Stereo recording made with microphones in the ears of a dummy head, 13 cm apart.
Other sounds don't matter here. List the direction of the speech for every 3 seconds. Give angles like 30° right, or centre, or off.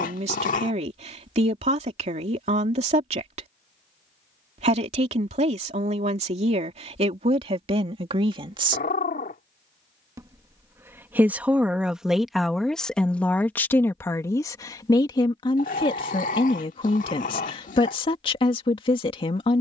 50° right, 50° right, 40° right, 10° right, 10° left, 40° left, 40° left.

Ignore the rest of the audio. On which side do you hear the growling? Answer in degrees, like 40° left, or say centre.
60° left.